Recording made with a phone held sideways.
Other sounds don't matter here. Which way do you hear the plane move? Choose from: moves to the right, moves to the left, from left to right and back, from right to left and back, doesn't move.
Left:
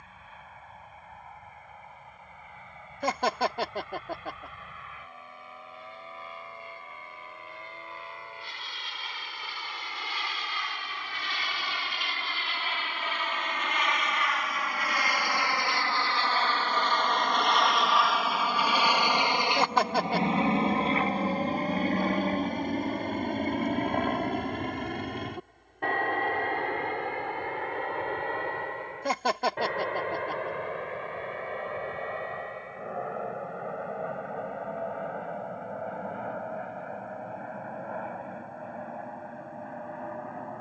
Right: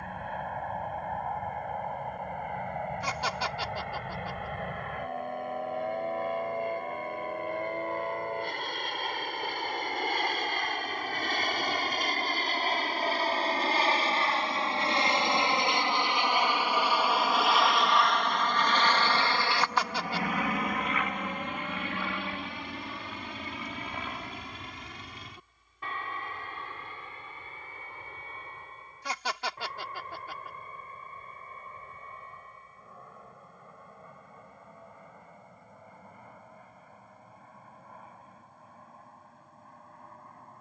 moves to the left.